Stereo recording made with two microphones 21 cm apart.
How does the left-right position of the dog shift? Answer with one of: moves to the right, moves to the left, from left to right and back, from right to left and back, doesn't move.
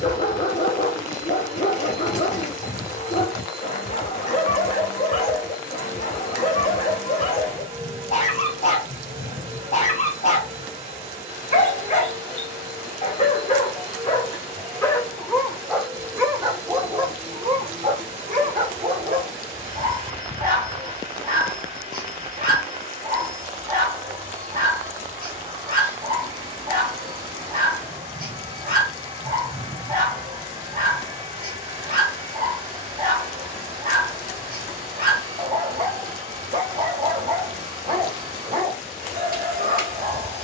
moves to the right.